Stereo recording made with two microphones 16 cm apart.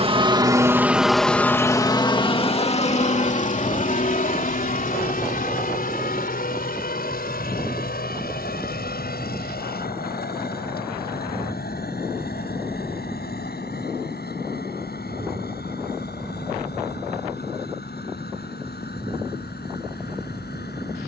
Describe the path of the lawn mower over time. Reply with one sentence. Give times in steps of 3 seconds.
You can hear the lawn mower in the centre from 0 s and on the left from 3 s.